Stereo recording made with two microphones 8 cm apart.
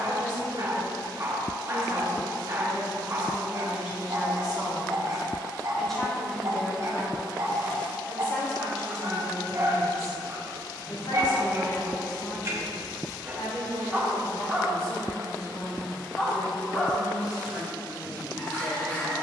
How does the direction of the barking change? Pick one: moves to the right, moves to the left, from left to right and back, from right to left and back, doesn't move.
moves to the left.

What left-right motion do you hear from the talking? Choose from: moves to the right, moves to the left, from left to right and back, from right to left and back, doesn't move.
moves to the left.